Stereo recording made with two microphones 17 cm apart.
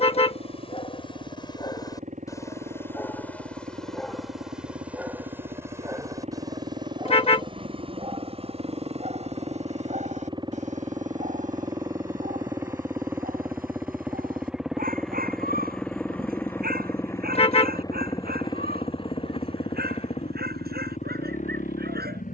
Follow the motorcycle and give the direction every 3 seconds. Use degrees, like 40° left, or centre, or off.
50° right, 50° right, 40° right, 30° right, 10° right, 10° left, 30° left, 50° left.